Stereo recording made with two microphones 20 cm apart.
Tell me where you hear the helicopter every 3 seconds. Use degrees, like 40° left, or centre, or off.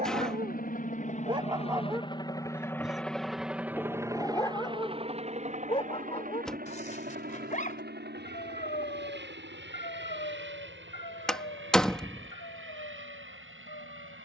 30° left, 20° right, 50° right, 60° right, 70° right.